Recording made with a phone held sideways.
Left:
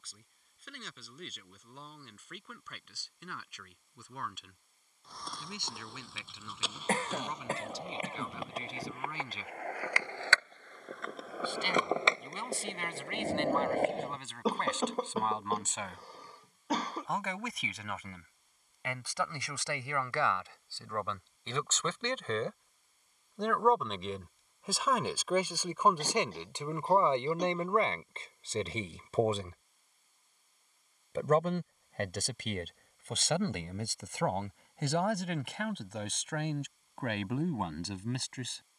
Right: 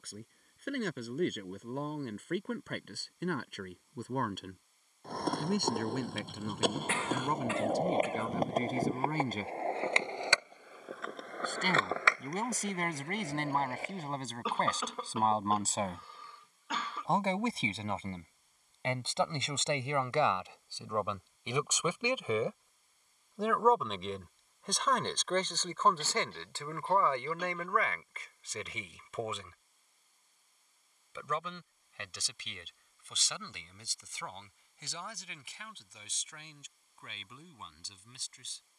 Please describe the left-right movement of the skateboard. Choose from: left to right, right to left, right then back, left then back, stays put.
right to left.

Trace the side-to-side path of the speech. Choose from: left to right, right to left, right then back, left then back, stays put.
right to left.